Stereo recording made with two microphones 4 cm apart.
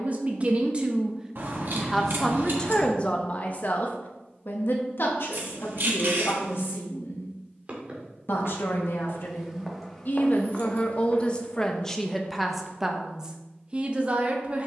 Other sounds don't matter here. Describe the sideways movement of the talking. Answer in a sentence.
In this clip you hear the talking move from right to left and back again.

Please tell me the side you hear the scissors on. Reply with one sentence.
You can hear the scissors on the right.